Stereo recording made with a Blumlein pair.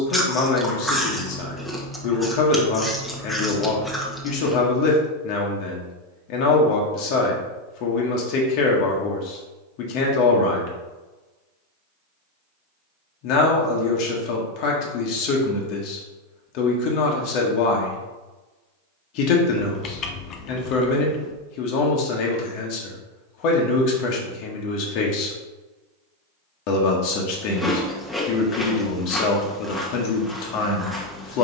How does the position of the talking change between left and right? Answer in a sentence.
In this clip you hear the talking stay put.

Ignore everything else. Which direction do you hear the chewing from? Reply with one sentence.
In this clip you hear the chewing in the centre.